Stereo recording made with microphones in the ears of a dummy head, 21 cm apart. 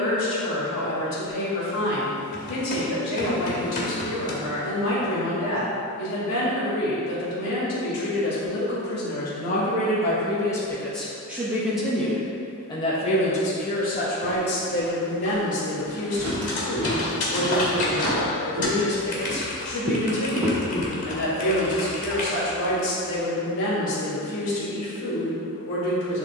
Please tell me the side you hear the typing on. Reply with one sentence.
You can hear the typing on the left.